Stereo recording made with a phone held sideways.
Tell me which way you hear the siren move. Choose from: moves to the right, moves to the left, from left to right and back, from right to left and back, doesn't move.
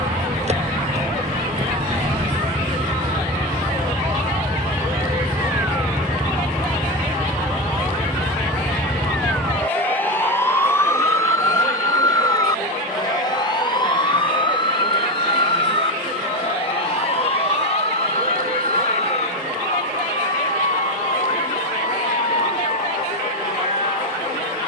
moves to the left.